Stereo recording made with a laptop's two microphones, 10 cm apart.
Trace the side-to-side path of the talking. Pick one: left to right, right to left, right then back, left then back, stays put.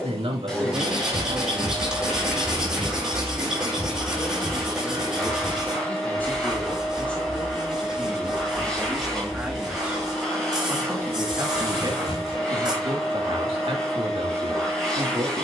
left then back.